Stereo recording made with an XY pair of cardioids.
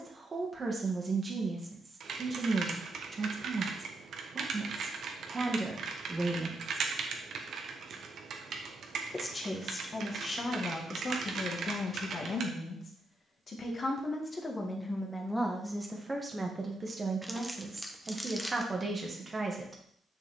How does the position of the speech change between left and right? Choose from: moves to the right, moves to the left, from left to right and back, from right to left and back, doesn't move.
from right to left and back.